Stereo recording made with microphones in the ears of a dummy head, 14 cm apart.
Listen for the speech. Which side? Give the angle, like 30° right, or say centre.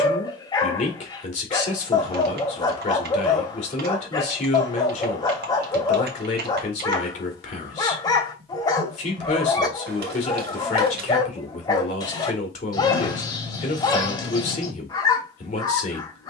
50° left.